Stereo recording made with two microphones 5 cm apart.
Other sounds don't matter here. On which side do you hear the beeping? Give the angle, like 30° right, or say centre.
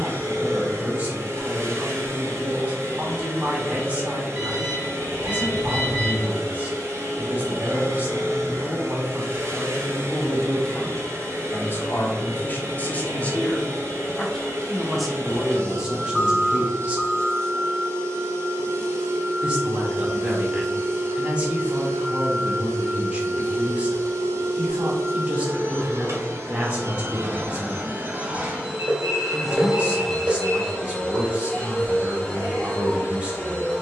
50° right.